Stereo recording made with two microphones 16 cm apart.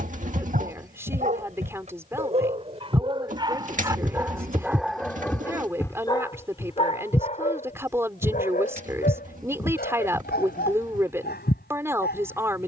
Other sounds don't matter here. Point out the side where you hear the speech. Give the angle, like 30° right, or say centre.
20° right.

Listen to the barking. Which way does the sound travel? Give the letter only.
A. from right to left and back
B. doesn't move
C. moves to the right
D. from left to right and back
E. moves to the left
E.